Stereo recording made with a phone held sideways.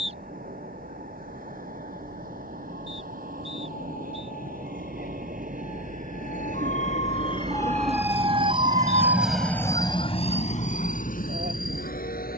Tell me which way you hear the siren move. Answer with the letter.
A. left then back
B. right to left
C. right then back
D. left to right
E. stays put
D.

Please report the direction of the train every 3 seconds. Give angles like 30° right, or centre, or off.
70° right, 70° right, 50° right, 40° left.